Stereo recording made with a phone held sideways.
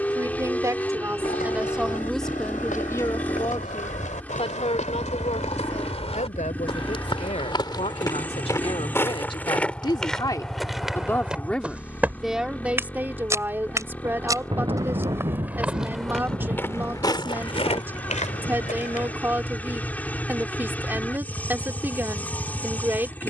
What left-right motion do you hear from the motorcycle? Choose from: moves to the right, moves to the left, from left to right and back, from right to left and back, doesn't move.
doesn't move.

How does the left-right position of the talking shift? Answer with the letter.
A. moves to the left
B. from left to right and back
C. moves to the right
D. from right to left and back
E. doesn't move
D.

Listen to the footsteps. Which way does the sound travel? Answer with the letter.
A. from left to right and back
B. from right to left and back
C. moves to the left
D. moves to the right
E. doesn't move
A.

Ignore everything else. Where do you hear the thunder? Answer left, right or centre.
right.